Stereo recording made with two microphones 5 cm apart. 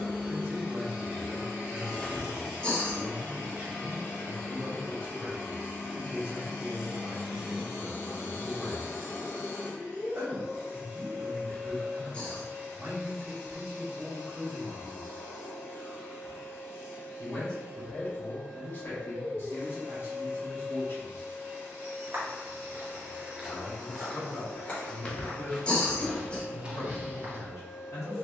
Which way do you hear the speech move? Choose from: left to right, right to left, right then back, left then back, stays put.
right to left.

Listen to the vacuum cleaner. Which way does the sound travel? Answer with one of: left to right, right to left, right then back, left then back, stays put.
stays put.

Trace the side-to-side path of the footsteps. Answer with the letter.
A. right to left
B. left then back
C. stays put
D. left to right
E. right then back
B.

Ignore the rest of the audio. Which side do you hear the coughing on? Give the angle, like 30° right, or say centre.
20° left.